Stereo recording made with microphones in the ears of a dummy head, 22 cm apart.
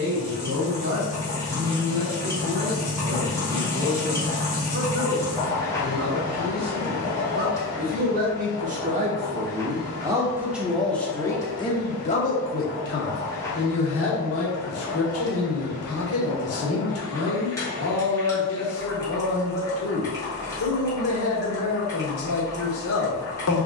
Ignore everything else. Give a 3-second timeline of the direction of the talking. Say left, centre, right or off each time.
right, right, right, centre, left, left, left, left.